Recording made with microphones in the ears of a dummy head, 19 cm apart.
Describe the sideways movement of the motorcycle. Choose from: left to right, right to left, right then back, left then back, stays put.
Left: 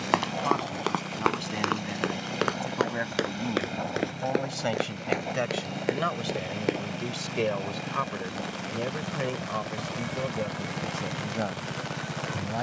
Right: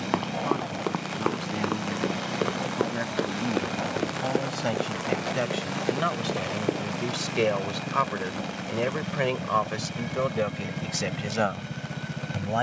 stays put.